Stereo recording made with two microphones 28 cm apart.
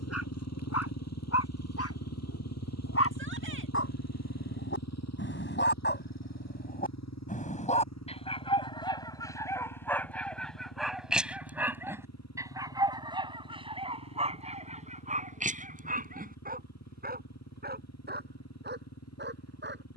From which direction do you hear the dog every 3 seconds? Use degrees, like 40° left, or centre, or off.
60° left, 50° left, 30° left, centre, 20° right, 30° right, 40° right.